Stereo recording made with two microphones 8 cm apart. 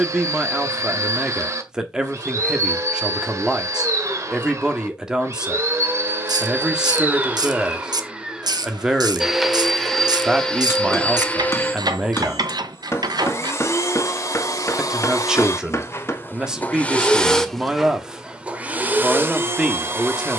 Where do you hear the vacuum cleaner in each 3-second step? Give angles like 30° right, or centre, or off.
40° right, 40° right, 20° right, 10° left, 40° left, 20° left, 20° right.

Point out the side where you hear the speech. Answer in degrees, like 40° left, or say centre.
10° right.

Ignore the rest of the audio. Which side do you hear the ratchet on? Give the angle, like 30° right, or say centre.
60° right.